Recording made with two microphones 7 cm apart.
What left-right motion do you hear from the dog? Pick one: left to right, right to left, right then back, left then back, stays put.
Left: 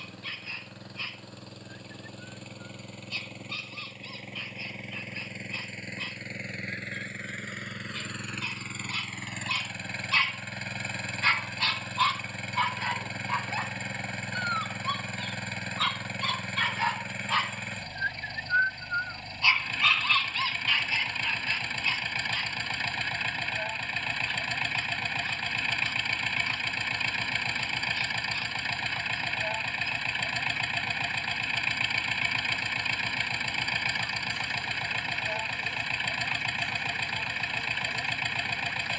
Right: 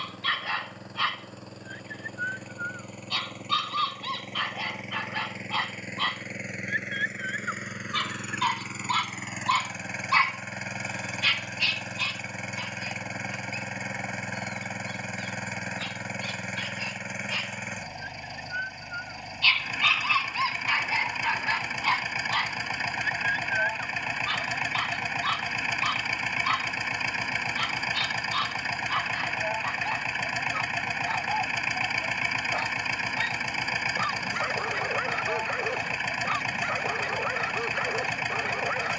left then back.